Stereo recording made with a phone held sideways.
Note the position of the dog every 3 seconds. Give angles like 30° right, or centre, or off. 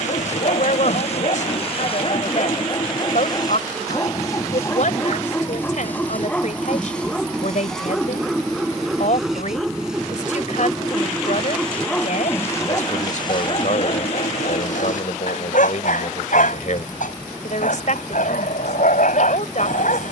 50° left, 20° left, centre, centre, 40° left, 70° left, 70° left.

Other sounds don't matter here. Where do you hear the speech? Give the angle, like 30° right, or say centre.
60° left.